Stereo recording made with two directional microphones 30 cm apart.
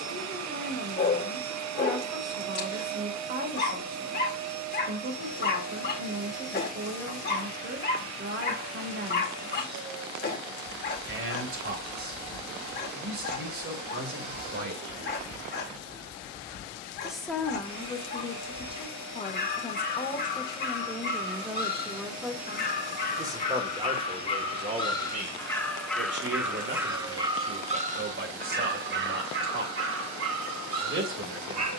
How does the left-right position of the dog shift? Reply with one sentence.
You can hear the dog move to the right.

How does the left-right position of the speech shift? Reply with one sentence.
You can hear the speech go left and come back.